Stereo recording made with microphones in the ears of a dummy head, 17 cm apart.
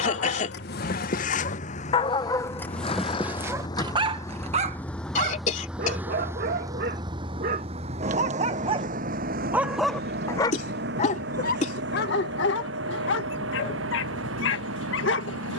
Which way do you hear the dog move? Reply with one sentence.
In this clip you hear the dog go right and come back.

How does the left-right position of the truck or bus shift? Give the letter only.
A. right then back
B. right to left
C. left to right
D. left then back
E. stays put
C.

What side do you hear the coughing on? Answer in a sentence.
You can hear the coughing on the left.